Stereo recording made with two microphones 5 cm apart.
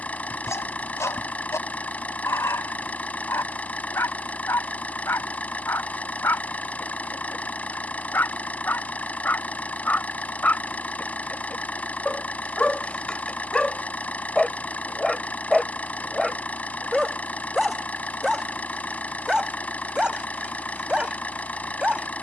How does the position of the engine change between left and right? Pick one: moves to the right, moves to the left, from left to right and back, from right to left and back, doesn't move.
doesn't move.